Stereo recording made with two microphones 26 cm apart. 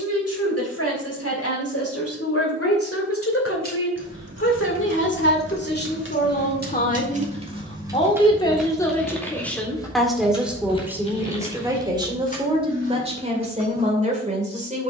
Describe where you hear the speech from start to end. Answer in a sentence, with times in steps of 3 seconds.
In this clip you hear the speech on the left from 0 s, in the centre from 9 s and on the right from 12 s.